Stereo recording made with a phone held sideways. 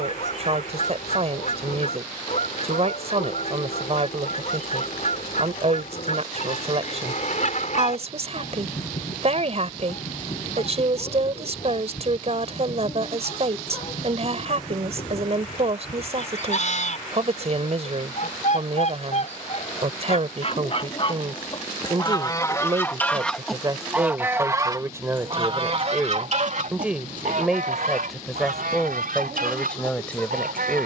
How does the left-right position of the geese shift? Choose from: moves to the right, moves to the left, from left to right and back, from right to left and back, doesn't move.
moves to the right.